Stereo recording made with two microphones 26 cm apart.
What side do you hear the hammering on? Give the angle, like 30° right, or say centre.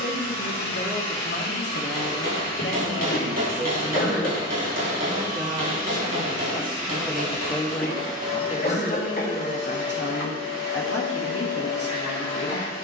70° right.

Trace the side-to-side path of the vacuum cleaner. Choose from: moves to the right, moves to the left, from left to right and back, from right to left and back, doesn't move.
doesn't move.